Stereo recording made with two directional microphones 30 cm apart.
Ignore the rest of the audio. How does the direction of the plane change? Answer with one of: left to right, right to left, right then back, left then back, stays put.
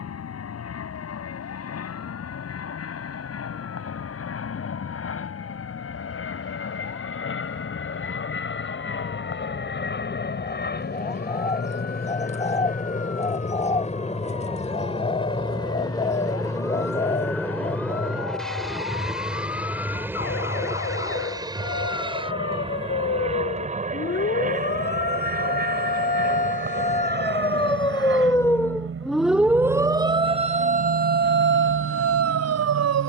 left to right.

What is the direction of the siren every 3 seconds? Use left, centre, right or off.
left, left, left, left, left, left, left, left, left, centre, right.